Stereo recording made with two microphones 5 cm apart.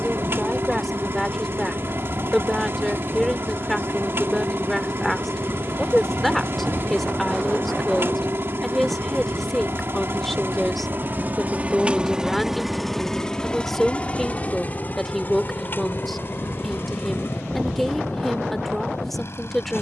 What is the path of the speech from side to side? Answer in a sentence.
You can hear the speech stay put.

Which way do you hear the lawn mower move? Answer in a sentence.
You can hear the lawn mower go from the right side to the left.